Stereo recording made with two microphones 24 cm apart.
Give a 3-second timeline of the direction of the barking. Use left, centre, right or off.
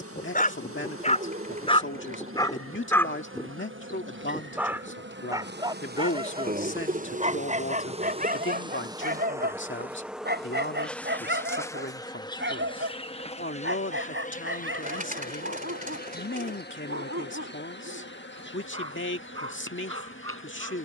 left, centre, right, right, right, right, right.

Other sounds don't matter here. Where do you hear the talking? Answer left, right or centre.
left.